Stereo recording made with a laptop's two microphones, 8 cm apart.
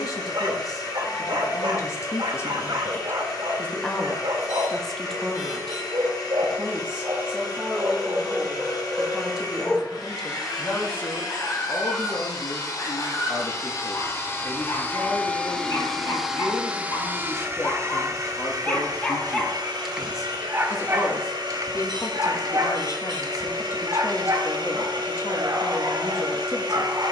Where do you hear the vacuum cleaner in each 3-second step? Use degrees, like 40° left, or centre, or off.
60° left, 60° left, 60° left, 60° left, 40° left, 10° right, 60° right, 70° right, 70° right.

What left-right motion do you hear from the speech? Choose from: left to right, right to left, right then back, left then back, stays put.
right then back.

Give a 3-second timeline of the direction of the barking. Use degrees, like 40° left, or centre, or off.
60° right, 60° right, 40° right, 20° left, 50° left, 40° left, centre, 50° right, 50° right.